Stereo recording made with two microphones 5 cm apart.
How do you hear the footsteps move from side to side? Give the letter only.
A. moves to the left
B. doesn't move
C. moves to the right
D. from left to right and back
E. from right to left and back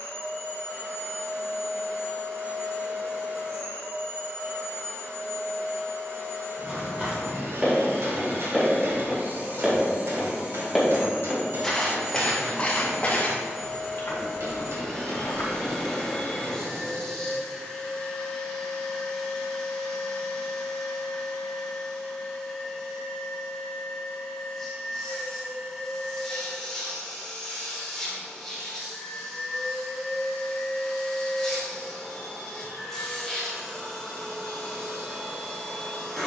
A.